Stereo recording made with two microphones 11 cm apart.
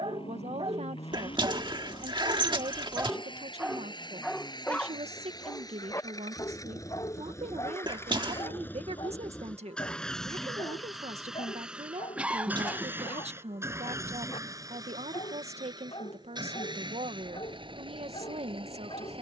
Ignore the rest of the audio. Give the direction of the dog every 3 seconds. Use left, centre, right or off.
right, centre, left, left, left, left, left.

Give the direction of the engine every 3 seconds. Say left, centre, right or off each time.
left, left, left, centre, right, right, right.